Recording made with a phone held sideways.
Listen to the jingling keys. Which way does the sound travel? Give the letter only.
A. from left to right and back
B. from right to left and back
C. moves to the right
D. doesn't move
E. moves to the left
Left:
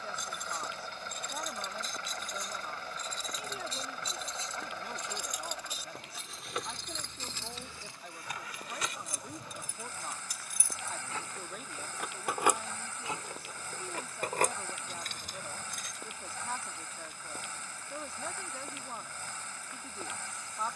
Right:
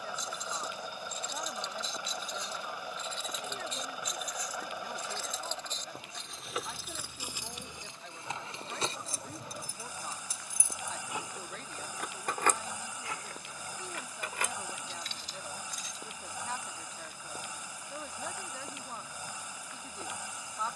A.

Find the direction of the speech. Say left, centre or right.
centre.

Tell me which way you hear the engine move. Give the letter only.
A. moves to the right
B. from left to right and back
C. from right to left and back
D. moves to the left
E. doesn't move
E.